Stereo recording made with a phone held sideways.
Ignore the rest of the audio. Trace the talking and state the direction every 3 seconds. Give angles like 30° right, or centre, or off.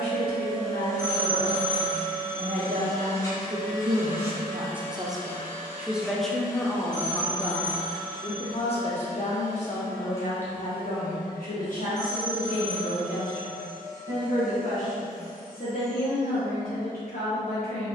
70° right, 40° right, 20° left, 50° left, 60° left, 70° left.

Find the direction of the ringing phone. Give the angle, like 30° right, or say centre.
20° right.